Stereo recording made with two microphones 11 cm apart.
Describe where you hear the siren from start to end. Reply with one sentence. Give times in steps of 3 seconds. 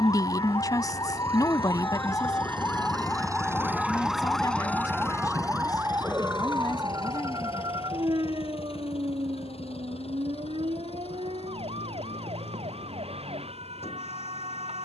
You can hear the siren on the left from 0 s, in the centre from 3 s and on the right from 6 s.